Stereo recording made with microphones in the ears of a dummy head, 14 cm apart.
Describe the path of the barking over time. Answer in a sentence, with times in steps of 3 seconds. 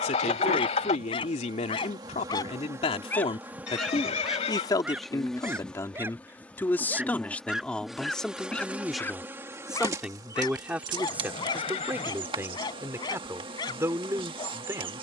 You can hear the barking on the left from 0 s, in the centre from 3 s and on the left from 9 s.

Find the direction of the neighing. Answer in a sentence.
In this clip you hear the neighing on the left.